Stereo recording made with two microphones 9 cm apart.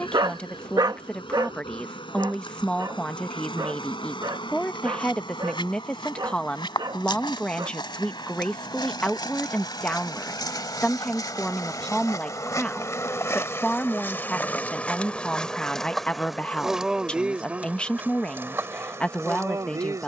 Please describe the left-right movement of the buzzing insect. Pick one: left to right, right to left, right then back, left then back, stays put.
left to right.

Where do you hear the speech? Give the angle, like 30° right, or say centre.
10° left.